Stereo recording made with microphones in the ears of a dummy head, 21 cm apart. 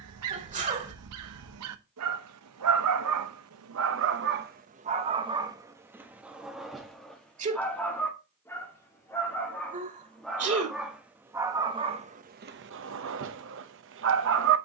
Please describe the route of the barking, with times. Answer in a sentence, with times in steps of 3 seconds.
In this clip you hear the barking on the right from 0 s, in the centre from 6 s and on the right from 12 s.